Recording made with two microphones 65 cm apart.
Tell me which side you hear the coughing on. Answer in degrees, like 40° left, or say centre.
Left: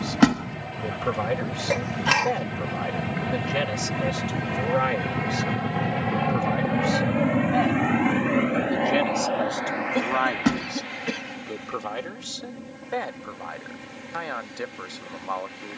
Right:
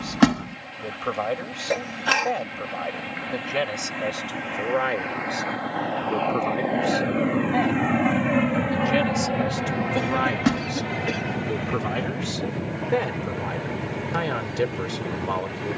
30° left.